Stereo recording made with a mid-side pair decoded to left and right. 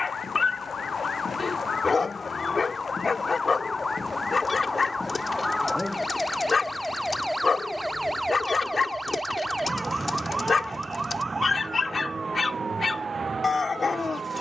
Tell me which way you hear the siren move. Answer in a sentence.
In this clip you hear the siren travel towards the right.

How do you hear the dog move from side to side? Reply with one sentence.
You can hear the dog stay put.